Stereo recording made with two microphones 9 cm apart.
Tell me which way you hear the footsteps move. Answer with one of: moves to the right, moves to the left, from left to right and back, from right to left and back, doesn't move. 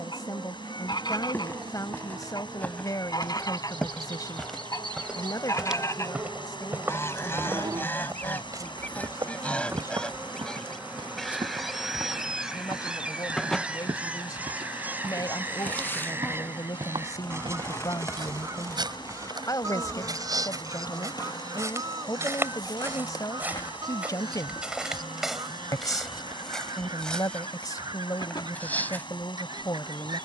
from left to right and back.